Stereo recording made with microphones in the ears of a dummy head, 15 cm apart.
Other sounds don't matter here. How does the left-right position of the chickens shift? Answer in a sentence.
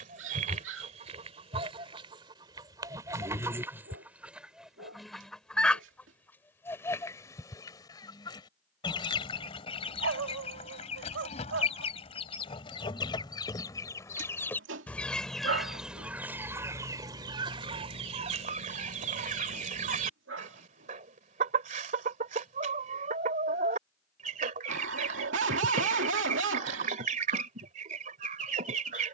In this clip you hear the chickens move from right to left and back again.